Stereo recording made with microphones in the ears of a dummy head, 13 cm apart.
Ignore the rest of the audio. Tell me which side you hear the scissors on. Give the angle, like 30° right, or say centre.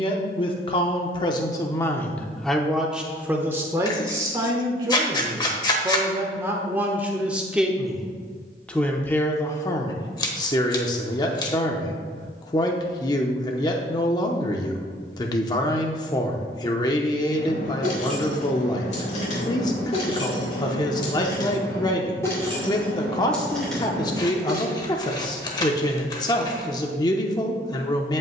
30° left.